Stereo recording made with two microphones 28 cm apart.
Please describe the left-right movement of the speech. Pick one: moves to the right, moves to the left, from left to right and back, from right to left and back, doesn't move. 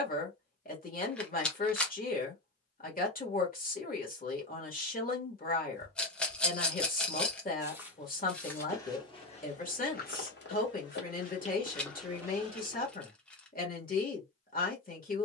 doesn't move.